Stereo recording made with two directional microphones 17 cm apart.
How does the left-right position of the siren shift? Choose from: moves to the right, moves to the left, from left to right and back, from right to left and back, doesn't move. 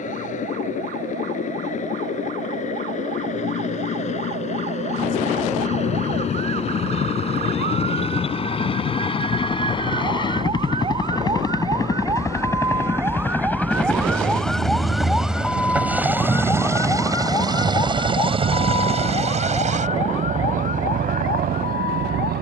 moves to the left.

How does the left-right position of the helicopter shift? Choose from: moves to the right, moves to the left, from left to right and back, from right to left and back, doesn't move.
moves to the right.